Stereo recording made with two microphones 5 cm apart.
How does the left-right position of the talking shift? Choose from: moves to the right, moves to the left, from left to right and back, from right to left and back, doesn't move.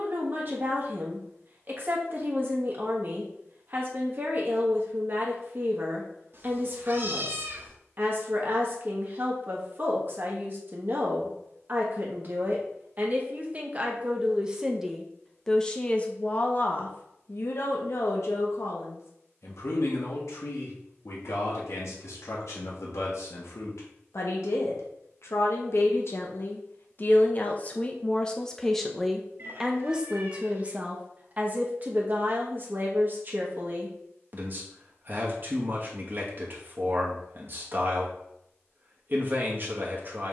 from right to left and back.